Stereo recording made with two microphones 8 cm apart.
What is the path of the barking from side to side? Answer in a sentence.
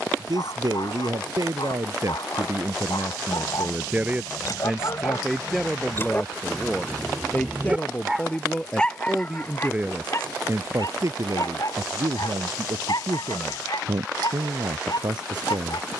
In this clip you hear the barking go right and come back.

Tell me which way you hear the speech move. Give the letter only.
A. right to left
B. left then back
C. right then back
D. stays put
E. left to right
B.